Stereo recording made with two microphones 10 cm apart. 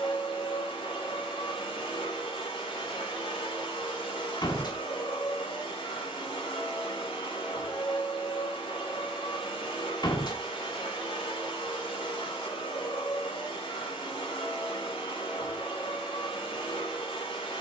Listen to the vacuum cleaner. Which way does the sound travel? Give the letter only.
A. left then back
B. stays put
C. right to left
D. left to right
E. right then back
B.